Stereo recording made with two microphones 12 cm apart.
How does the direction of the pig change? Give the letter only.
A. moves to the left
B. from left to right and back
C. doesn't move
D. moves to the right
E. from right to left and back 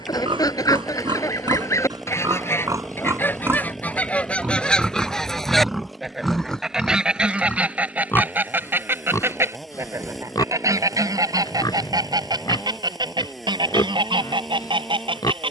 A.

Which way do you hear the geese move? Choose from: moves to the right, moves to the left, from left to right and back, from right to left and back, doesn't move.
moves to the right.